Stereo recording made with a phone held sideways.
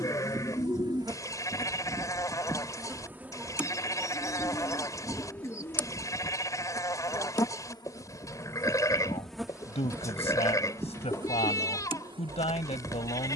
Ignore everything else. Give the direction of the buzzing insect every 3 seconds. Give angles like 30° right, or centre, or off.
30° right, centre, 20° left, 20° right, 40° right.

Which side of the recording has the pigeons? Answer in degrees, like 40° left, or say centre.
20° left.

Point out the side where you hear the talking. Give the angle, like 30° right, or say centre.
50° left.